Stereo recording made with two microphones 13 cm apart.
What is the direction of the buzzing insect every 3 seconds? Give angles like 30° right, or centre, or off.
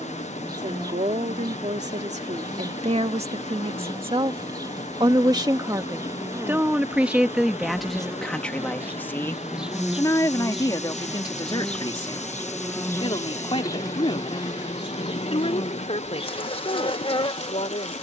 30° right, 30° right, 20° right, centre, 20° left, 40° left.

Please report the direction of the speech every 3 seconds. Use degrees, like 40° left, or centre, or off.
60° right, 40° right, centre, 30° left, 40° left, 50° left.